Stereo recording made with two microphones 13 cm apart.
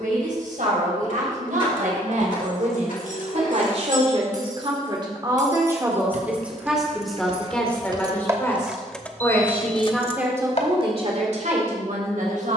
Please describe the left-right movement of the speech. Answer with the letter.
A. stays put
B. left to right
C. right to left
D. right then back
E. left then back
E.